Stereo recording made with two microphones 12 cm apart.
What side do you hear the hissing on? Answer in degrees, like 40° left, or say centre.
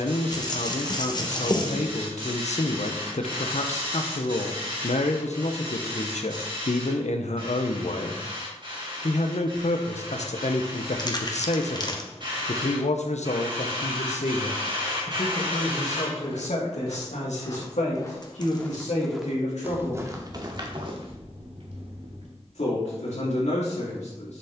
40° right.